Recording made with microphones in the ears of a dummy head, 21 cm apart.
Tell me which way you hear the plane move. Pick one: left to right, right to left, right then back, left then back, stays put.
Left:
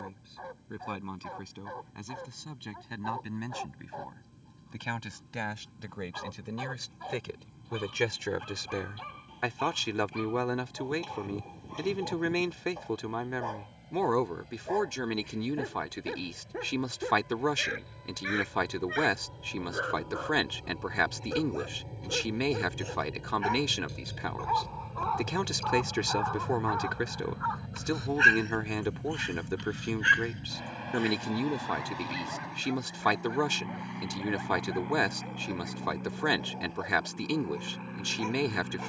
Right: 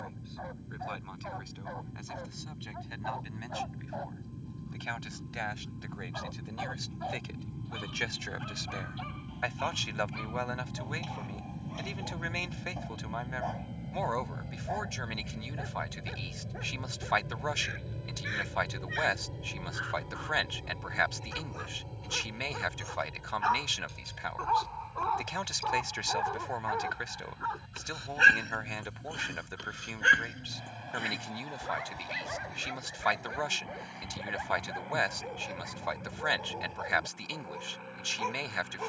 right to left.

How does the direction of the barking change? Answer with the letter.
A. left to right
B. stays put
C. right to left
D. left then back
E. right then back
A.